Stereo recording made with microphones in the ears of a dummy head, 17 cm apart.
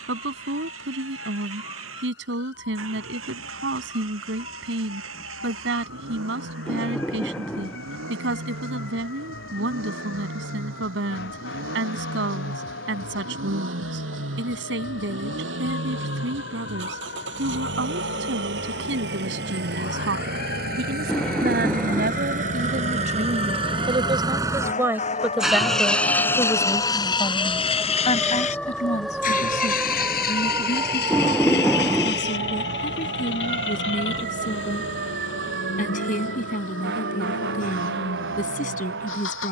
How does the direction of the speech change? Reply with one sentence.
You can hear the speech go from the right side to the left.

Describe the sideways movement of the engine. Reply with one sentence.
In this clip you hear the engine move to the left.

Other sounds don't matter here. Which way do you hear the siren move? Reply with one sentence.
In this clip you hear the siren move to the right.